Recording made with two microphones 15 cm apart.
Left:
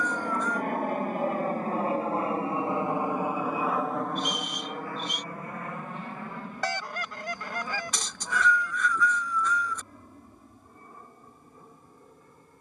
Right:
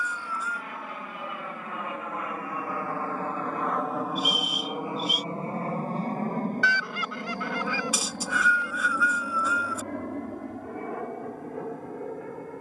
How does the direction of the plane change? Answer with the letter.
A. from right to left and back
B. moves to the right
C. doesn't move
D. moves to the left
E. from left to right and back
B.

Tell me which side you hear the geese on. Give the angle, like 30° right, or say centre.
40° left.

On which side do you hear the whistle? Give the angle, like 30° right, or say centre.
10° right.